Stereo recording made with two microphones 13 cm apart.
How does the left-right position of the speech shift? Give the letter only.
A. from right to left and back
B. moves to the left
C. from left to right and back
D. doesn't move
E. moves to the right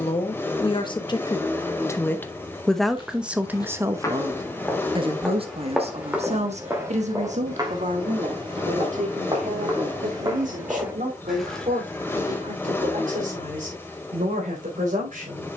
E.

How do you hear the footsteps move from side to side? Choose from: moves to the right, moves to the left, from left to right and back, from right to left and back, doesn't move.
from left to right and back.